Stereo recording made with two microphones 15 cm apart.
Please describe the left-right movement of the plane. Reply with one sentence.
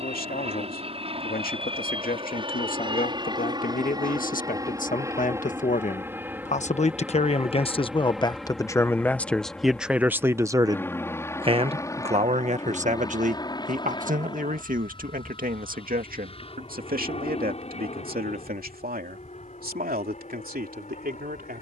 You can hear the plane move from right to left.